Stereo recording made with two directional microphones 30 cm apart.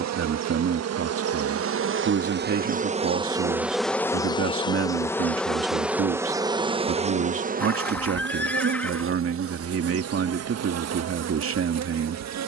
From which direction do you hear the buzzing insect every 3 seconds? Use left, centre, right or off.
right, centre, right, right.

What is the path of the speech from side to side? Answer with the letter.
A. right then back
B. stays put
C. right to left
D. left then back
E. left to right
B.